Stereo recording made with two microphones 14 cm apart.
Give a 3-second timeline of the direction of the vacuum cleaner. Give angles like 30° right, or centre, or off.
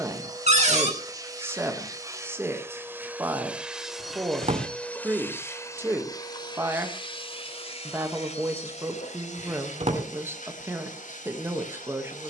20° right, centre, 40° left, 60° left.